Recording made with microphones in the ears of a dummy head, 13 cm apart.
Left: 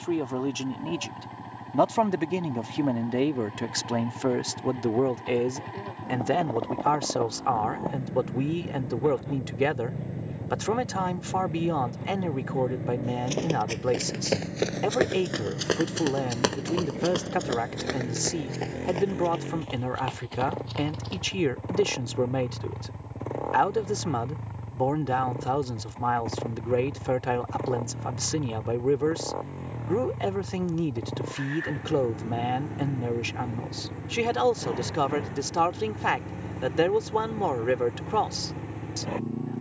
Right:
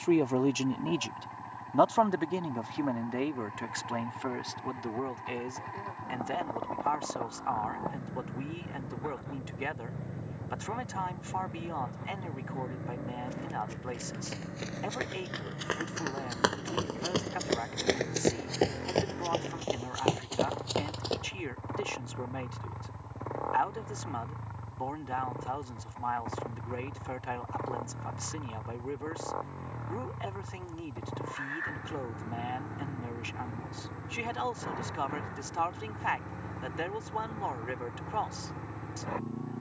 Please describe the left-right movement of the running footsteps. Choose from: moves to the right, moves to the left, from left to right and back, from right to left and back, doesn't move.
moves to the right.